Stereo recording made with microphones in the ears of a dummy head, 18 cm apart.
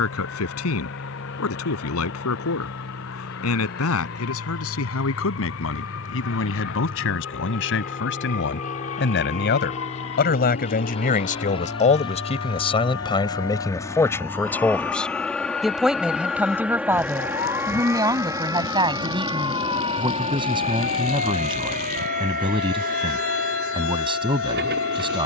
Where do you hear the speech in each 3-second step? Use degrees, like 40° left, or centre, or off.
80° left, 80° left, 70° left, 50° left, 20° left, 10° right, 20° right, 20° right, 20° right.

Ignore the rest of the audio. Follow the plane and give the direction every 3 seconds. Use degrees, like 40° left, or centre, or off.
50° left, 50° left, 40° left, 30° left, 20° left, centre, 20° right, 40° right, 50° right.